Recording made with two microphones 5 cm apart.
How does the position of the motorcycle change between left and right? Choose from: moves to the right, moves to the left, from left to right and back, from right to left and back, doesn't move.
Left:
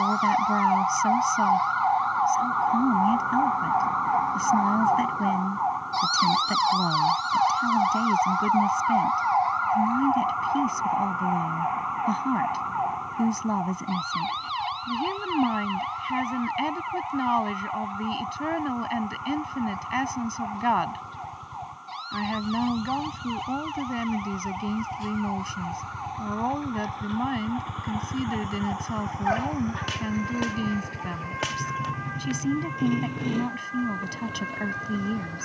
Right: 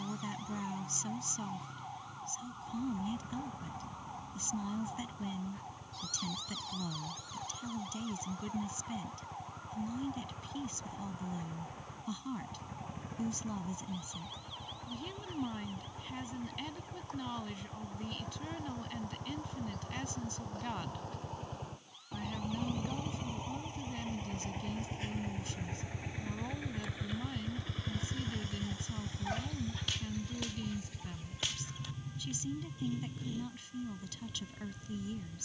moves to the left.